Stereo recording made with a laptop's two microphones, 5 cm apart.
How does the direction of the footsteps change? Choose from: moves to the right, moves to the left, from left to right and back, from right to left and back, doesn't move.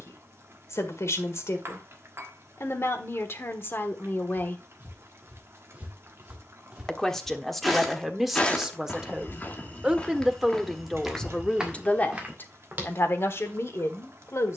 from right to left and back.